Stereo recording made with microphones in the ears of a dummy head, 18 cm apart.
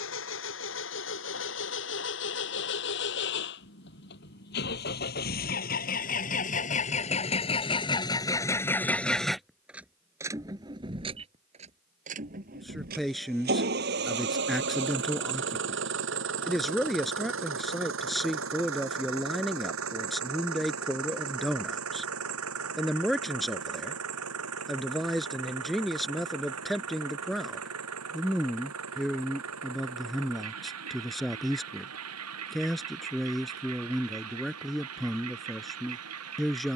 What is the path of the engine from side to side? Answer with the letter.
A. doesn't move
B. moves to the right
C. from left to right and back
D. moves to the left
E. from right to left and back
B.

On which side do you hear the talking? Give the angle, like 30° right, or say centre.
centre.